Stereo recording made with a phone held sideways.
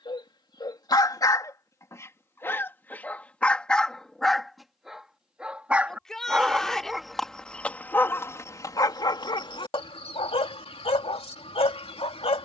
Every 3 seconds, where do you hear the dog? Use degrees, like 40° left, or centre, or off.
20° left, centre, 10° left, 40° left.